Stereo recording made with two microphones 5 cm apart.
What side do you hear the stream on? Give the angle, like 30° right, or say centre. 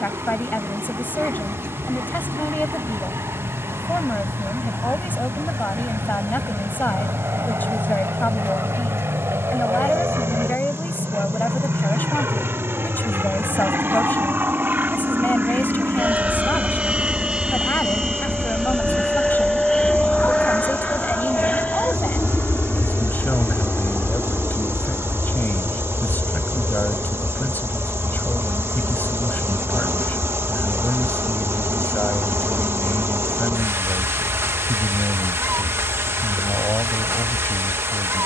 60° right.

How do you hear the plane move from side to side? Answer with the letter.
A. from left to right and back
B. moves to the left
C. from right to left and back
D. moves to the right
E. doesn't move
B.